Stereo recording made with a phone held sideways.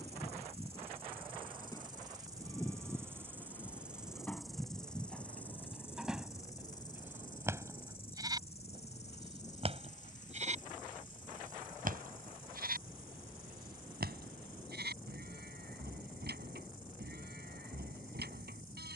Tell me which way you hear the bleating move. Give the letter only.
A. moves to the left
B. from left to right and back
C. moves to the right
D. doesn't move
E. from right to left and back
C.